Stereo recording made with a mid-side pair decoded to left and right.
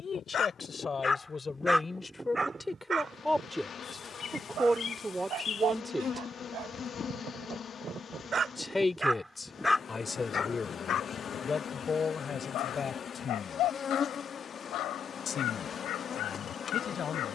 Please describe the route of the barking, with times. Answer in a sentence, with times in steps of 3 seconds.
You can hear the barking in the centre from 0 s, on the right from 3 s and on the left from 9 s.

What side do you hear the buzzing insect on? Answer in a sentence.
You can hear the buzzing insect on the left.